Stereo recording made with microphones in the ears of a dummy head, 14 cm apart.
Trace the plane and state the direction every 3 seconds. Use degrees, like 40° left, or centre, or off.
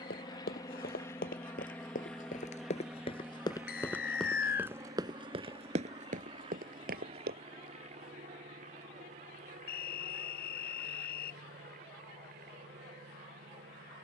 10° left, 20° right, 40° right, 50° right, 50° right.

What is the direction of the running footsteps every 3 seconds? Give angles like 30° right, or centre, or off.
60° left, centre, 60° right, off, off.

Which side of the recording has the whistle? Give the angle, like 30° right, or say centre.
70° left.